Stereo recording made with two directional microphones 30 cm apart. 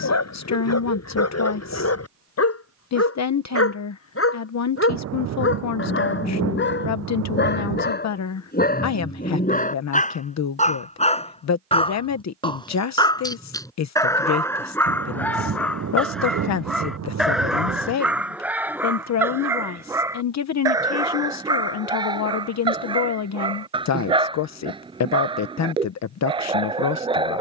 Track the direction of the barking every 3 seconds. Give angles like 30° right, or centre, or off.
60° left, 40° left, 30° left, 20° left, 10° left, centre, 10° right, 10° right, 20° right.